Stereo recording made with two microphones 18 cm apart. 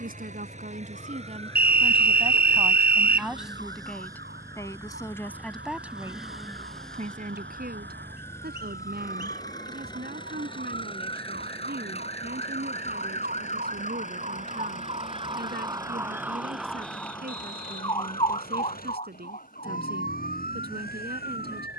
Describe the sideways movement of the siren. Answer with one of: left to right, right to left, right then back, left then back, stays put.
right to left.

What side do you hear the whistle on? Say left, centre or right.
right.